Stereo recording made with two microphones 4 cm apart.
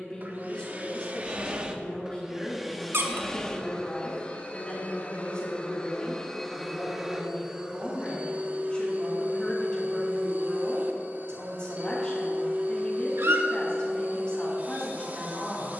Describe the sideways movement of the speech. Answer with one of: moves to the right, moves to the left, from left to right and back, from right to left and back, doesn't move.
doesn't move.